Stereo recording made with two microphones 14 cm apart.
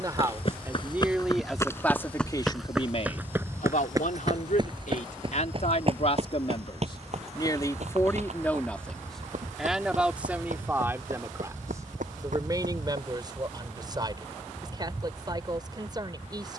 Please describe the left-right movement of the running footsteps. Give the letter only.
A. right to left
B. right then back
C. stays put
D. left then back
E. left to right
E.